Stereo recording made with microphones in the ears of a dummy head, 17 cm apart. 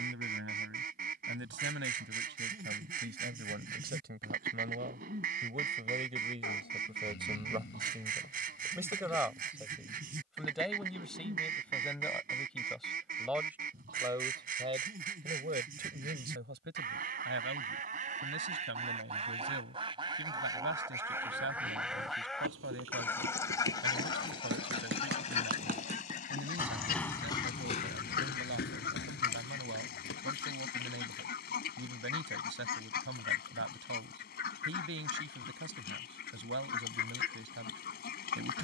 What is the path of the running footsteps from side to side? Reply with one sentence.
You can hear the running footsteps go from the right side to the left.